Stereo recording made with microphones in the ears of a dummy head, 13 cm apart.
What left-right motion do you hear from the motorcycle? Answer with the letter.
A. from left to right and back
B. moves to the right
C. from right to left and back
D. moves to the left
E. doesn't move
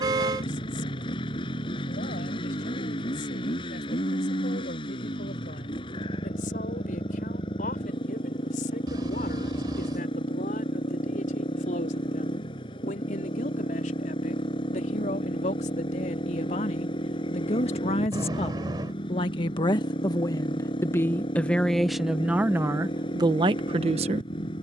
E.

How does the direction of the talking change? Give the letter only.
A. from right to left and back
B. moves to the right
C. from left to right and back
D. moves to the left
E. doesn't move
B.